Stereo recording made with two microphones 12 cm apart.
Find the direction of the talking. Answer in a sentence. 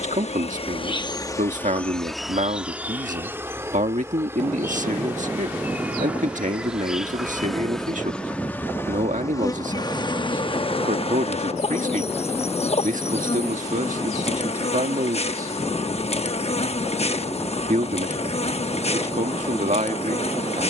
In this clip you hear the talking on the right.